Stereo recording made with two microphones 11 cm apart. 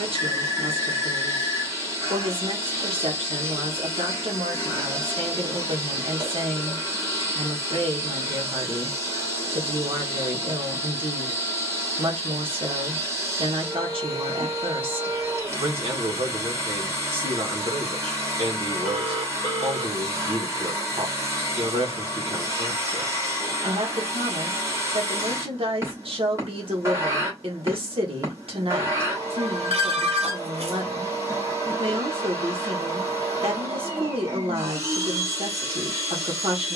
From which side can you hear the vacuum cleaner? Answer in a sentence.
You can hear the vacuum cleaner on the right.